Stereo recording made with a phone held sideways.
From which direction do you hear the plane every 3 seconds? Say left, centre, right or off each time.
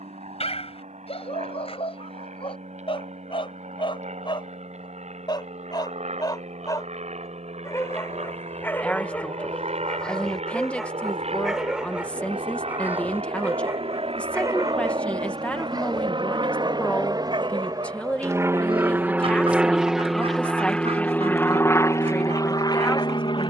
right, right, right, right, right, right, centre, left.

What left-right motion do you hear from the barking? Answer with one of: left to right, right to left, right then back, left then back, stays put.
left to right.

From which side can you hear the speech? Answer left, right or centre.
centre.